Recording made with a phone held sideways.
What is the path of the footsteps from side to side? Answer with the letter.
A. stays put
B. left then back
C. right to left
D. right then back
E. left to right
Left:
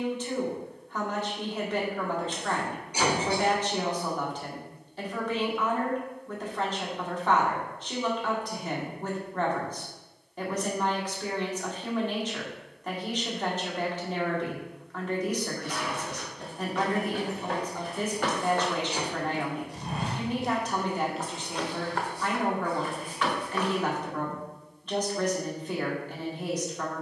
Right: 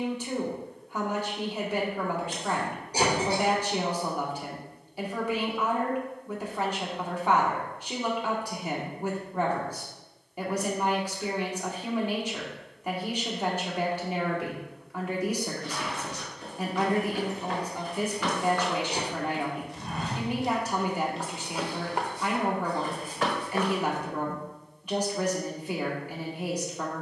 E.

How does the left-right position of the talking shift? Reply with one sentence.
In this clip you hear the talking stay in one place.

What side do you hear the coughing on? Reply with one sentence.
You can hear the coughing on the right.